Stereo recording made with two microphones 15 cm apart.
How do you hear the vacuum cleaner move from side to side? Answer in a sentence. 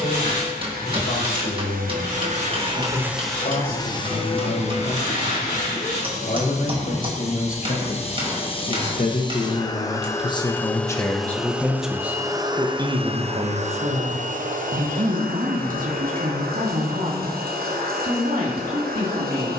In this clip you hear the vacuum cleaner go left and come back.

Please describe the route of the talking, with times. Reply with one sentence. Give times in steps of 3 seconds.
In this clip you hear the talking on the left from 0 s and on the right from 12 s.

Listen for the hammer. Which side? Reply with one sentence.
In this clip you hear the hammer on the right.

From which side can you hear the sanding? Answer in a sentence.
You can hear the sanding on the left.